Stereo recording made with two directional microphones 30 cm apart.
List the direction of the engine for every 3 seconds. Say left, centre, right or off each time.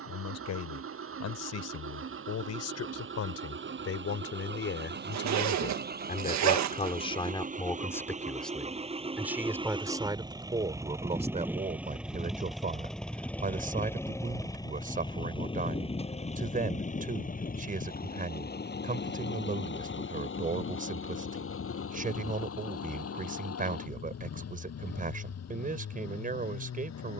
right, right, right, centre, centre, left, left, left, left.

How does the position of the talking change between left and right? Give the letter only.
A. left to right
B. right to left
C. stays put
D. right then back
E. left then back
A.